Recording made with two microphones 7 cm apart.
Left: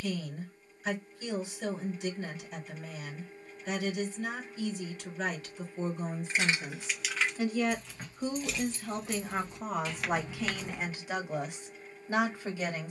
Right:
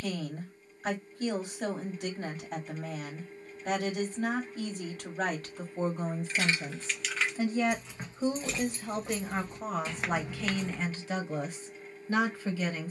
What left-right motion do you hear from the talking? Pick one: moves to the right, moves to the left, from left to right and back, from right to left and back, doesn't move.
moves to the left.